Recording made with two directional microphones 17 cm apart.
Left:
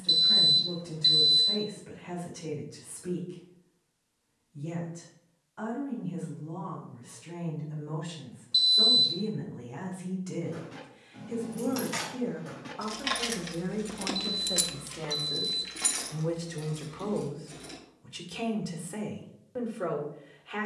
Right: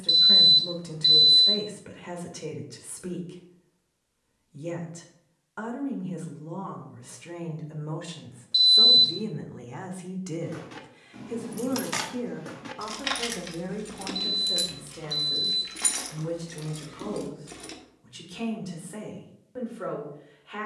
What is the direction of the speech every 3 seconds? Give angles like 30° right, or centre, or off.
60° right, 60° right, 60° right, 40° right, 10° right, 10° left, 10° left.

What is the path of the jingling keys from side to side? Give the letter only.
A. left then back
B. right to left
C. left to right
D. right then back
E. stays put
A.